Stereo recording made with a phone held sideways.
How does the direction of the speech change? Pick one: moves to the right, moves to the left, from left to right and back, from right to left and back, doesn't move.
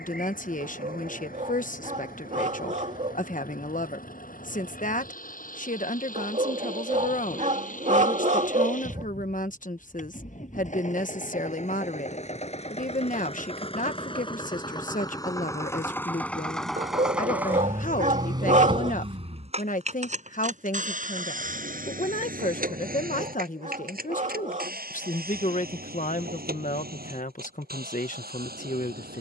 doesn't move.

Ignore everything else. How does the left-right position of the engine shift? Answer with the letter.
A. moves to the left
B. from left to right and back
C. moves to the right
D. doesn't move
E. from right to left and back
C.